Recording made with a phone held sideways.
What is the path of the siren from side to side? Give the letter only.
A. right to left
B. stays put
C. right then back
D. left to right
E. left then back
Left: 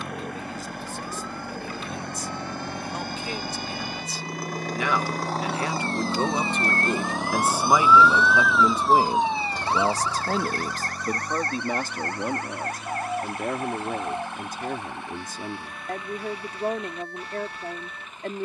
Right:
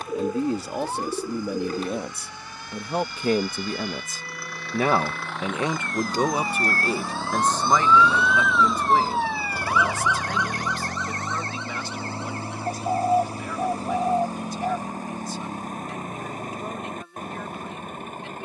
A.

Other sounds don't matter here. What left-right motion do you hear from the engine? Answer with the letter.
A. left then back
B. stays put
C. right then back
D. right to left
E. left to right
E.